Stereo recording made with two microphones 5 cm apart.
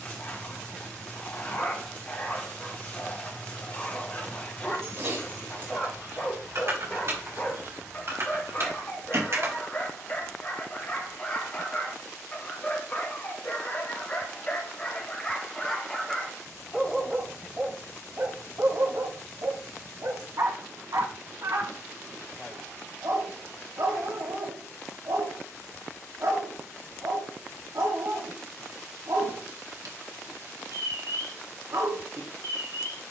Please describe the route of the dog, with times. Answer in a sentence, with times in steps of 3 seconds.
You can hear the dog on the left from 0 s, in the centre from 15 s and on the right from 18 s.